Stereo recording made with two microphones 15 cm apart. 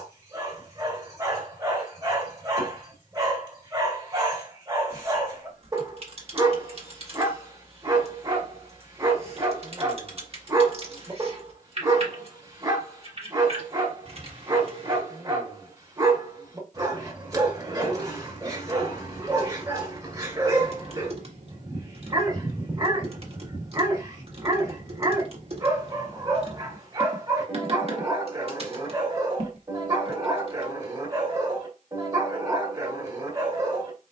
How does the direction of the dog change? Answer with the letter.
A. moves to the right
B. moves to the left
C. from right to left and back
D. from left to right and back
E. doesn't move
E.